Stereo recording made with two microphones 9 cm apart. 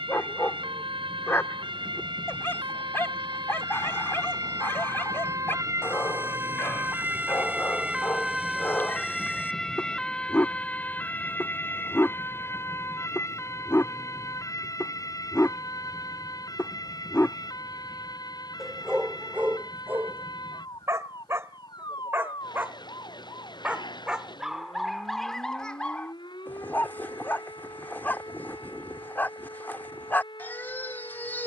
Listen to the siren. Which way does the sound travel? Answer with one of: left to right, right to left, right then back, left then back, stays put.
right to left.